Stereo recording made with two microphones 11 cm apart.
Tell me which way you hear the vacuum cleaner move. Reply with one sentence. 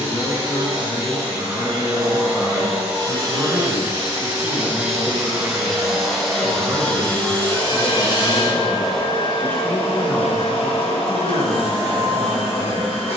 You can hear the vacuum cleaner travel towards the left.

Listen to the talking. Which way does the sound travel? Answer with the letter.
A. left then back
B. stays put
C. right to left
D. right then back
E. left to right
D.